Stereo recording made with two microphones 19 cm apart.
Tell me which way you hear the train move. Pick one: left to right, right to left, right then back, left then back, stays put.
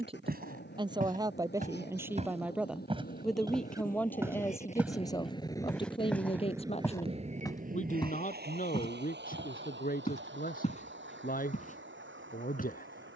left to right.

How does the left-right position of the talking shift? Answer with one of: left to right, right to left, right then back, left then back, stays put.
right to left.